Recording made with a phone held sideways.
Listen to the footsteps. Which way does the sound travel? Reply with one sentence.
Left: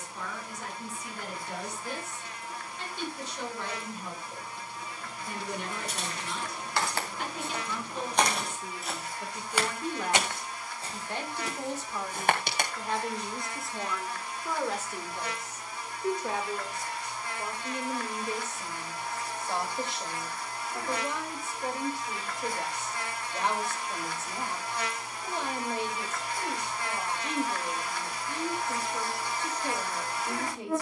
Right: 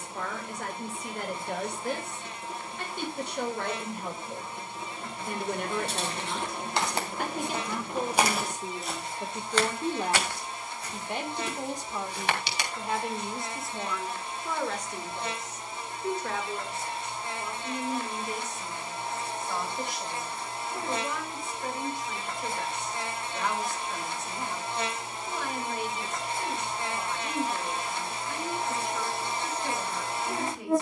You can hear the footsteps move from right to left.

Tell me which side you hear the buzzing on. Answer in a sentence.
You can hear the buzzing on the right.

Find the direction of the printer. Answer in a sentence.
In this clip you hear the printer on the right.